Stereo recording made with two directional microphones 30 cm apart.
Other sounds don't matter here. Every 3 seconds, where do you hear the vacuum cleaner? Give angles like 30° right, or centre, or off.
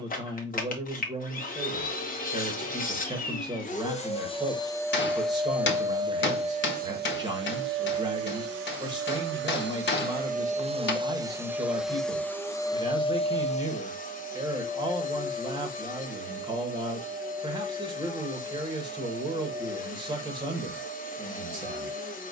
30° left, 10° left, 40° right, 20° right, 20° left, 30° left, 30° left, 30° left.